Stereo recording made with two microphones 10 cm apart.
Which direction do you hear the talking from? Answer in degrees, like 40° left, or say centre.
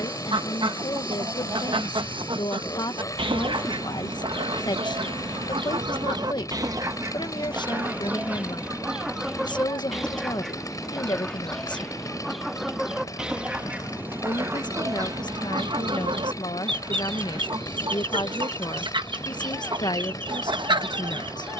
50° left.